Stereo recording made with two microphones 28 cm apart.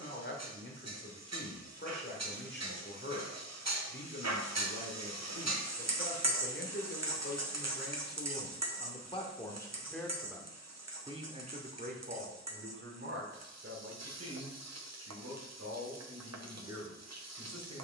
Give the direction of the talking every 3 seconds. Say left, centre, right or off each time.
left, left, left, centre, right, right.